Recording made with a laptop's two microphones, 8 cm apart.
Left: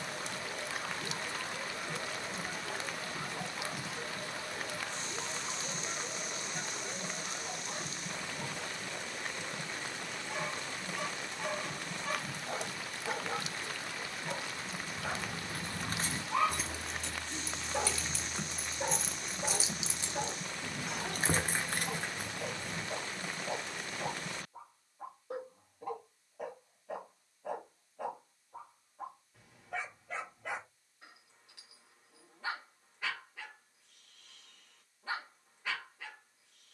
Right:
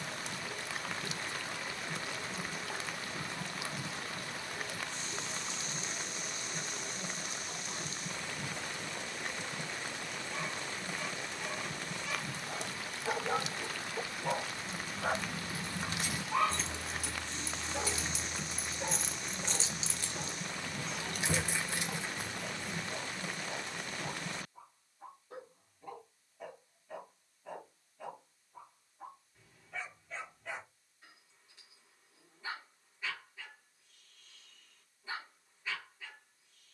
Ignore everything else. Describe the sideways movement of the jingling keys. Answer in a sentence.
In this clip you hear the jingling keys go right and come back.